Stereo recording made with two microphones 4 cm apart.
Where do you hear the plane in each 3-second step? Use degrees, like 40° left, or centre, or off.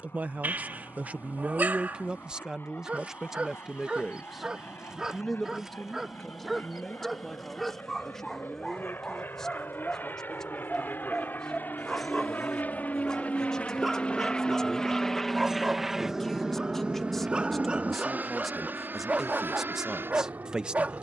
80° left, 70° left, 70° left, 60° left, 30° left, 20° right, 60° right.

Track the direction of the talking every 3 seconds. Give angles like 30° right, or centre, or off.
40° right, 10° right, centre, 10° left, 10° left, centre, 10° right.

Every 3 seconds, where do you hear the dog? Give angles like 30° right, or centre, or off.
50° right, 20° right, centre, 10° left, centre, 20° right, 30° right.